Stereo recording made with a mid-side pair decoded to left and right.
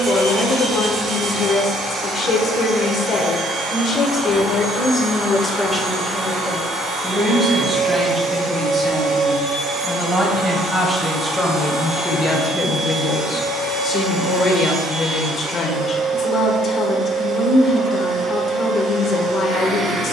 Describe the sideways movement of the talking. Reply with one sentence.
You can hear the talking go right and come back.